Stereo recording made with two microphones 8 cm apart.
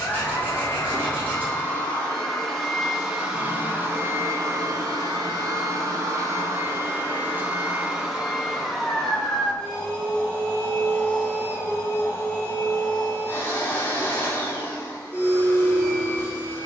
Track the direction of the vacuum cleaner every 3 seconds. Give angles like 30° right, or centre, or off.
20° left, 40° right, 20° right, 20° left, 30° left, 30° left.